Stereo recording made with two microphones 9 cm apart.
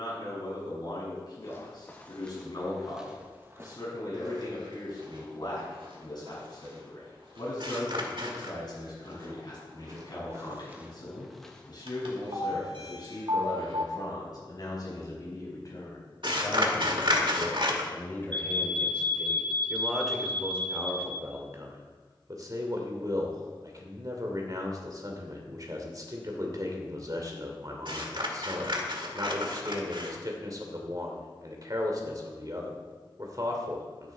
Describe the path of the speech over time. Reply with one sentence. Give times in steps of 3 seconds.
You can hear the speech on the left from 0 s, in the centre from 18 s and on the right from 21 s.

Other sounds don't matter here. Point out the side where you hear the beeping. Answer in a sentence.
In this clip you hear the beeping on the right.